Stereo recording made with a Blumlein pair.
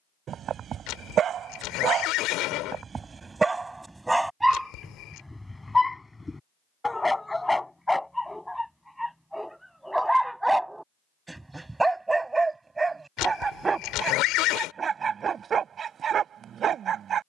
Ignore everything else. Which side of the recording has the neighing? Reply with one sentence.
You can hear the neighing on the left.